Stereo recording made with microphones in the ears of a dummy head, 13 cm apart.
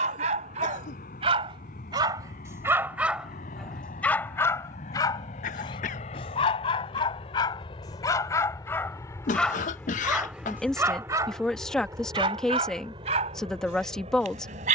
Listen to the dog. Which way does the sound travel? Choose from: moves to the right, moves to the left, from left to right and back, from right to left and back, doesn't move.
from right to left and back.